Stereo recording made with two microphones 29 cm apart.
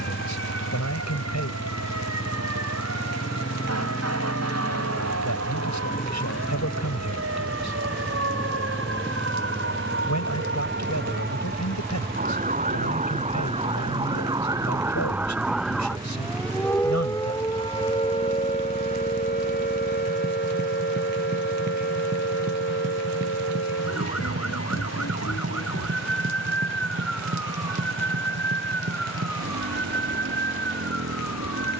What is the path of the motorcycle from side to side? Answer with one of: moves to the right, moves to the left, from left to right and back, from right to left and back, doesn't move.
moves to the right.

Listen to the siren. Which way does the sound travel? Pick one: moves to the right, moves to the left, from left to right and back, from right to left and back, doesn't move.
moves to the left.